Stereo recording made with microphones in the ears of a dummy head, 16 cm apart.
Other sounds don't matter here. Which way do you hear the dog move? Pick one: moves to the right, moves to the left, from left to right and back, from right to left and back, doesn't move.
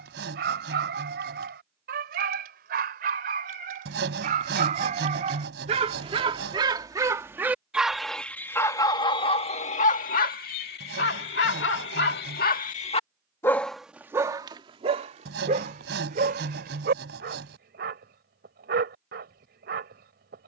from right to left and back.